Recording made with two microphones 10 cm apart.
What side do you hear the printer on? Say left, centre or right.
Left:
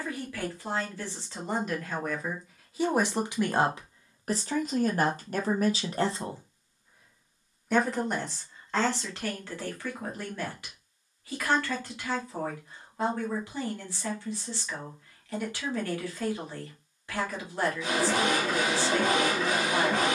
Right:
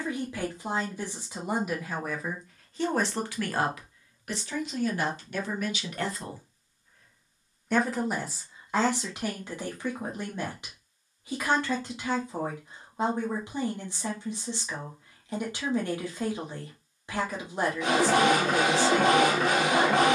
right.